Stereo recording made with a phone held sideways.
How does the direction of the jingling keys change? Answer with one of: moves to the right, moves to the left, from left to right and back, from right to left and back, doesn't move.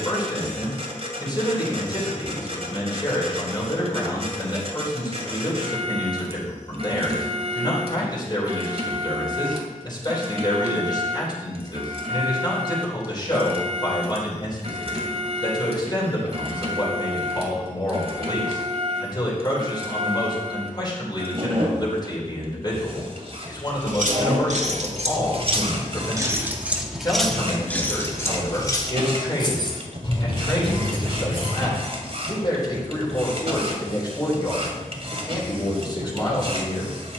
moves to the left.